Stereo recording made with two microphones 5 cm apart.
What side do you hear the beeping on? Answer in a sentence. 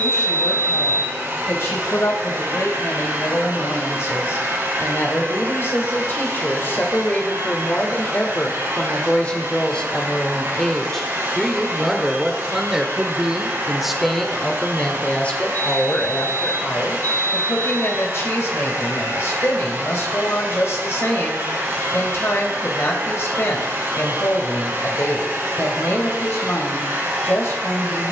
You can hear the beeping on the left.